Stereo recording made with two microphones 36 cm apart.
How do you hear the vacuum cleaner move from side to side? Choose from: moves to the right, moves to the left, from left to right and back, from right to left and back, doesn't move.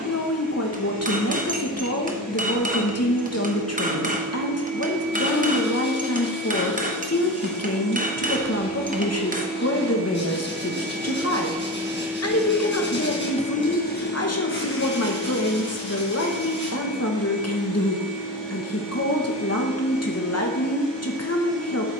moves to the left.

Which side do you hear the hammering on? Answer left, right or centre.
right.